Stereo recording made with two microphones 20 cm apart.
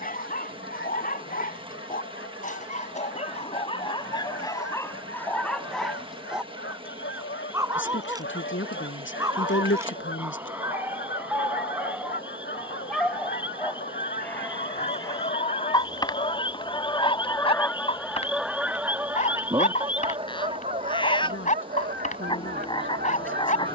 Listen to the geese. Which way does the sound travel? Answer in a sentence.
You can hear the geese travel towards the right.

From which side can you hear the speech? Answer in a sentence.
You can hear the speech on the left.